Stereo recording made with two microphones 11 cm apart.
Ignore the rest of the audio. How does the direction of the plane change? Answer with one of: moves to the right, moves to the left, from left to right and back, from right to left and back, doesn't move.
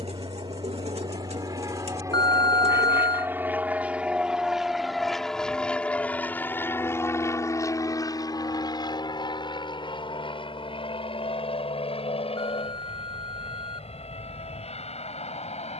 moves to the left.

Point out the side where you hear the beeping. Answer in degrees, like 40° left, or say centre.
40° left.